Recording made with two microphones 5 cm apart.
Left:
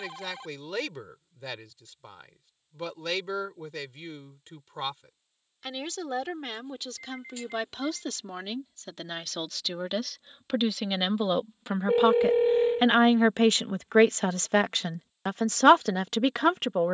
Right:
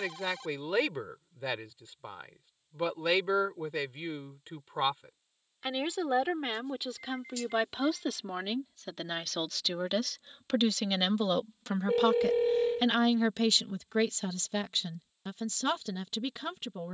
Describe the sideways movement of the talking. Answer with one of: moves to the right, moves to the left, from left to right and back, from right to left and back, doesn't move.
moves to the left.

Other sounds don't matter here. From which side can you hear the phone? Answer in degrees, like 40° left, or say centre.
20° left.